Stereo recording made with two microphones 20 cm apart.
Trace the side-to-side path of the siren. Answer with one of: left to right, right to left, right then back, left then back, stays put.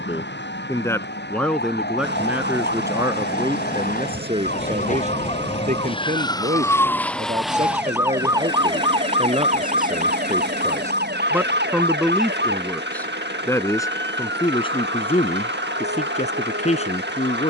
left to right.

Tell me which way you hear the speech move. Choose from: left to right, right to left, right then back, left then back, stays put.
right then back.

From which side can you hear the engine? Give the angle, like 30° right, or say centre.
60° right.